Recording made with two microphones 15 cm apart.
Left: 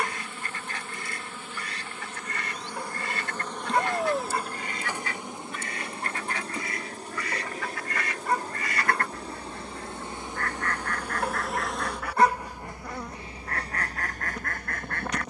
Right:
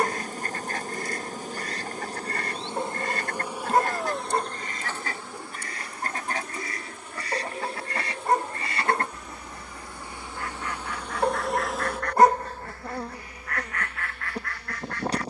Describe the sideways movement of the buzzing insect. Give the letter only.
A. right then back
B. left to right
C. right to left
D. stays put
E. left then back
E.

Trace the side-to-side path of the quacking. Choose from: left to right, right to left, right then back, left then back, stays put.
right to left.